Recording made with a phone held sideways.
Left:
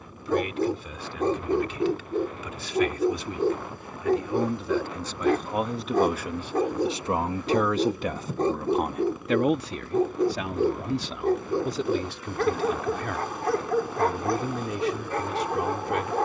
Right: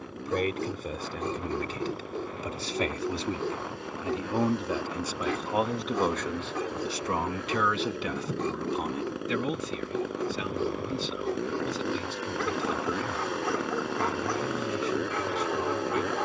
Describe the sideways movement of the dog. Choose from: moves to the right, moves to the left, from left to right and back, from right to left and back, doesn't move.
doesn't move.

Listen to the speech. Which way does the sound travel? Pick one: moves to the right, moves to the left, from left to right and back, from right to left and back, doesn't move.
moves to the left.